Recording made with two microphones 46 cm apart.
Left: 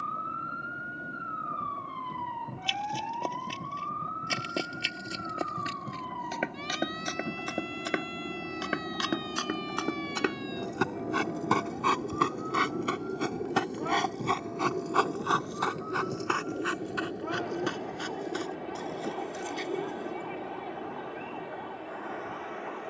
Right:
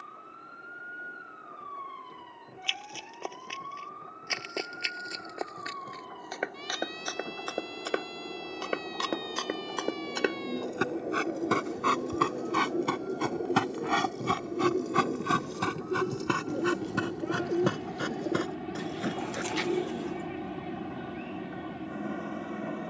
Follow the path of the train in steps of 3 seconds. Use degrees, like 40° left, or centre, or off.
50° left, 50° left, 40° left, 30° left, 10° left, 10° right, 30° right, 50° right.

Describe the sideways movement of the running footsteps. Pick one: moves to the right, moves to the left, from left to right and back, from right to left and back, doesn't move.
moves to the right.